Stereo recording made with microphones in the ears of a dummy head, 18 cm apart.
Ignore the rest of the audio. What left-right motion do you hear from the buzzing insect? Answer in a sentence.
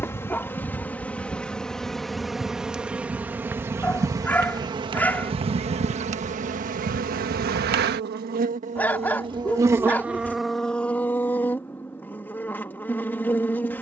You can hear the buzzing insect move from left to right and back again.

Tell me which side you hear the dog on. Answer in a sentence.
You can hear the dog in the centre.